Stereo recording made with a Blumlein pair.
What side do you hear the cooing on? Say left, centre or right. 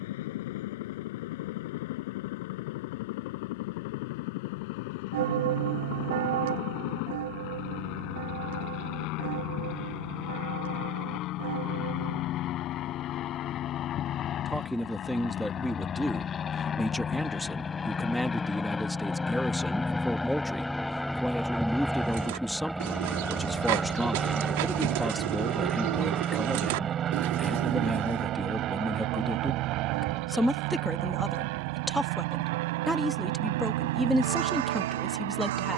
right.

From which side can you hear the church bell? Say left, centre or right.
right.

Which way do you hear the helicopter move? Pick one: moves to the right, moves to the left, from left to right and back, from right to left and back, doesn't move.
moves to the right.